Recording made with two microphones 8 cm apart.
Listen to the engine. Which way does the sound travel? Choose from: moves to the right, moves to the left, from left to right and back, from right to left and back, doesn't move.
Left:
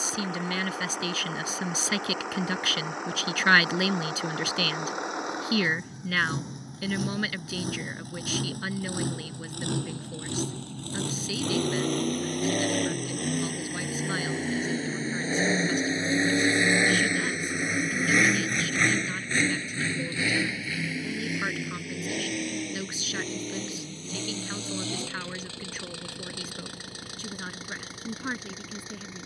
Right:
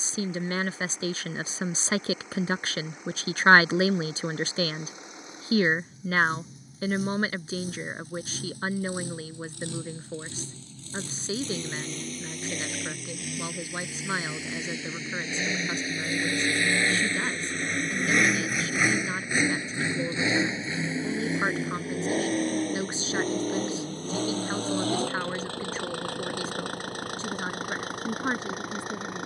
moves to the right.